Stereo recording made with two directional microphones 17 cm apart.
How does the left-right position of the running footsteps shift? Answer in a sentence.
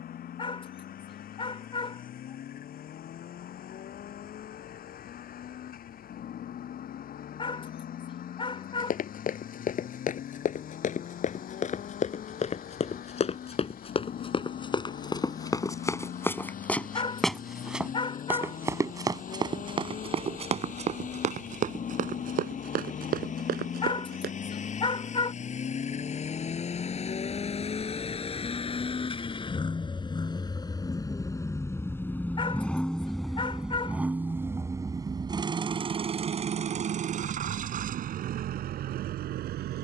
In this clip you hear the running footsteps go from the left side to the right.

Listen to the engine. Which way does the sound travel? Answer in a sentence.
In this clip you hear the engine move to the right.